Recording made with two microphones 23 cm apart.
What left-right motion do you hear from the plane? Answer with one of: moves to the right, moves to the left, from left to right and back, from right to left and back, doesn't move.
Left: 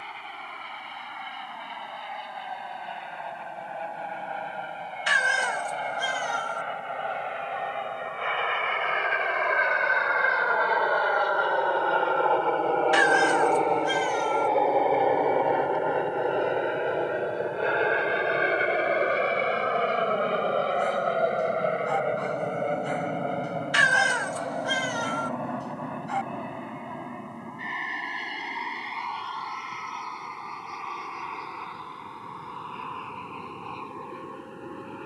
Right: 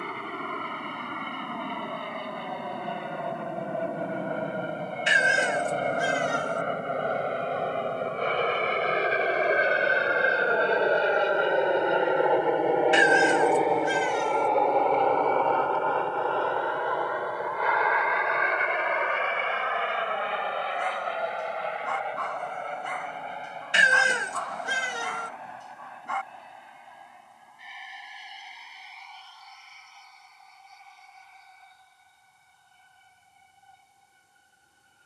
moves to the left.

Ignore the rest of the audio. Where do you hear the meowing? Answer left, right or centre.
right.